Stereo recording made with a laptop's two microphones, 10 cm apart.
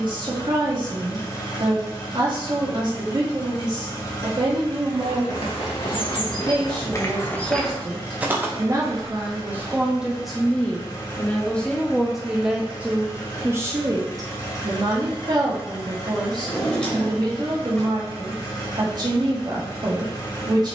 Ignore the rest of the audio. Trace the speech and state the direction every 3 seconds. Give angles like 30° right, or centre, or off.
50° right, 50° right, 40° right, centre, 20° right, 40° right, 40° right.